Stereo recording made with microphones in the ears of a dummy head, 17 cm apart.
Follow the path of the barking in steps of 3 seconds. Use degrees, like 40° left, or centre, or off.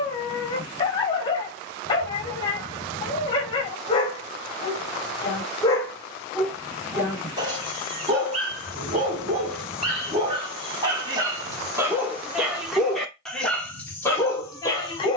30° left, 20° left, 30° right, 30° right, 10° left.